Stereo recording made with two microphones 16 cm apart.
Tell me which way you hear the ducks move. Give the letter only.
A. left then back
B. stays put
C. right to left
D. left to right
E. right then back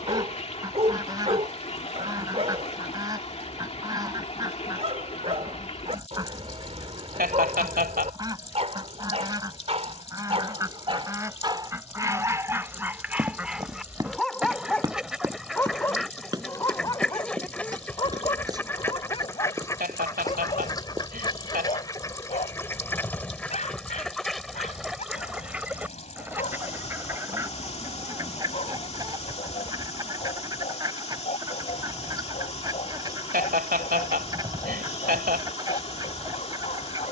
A.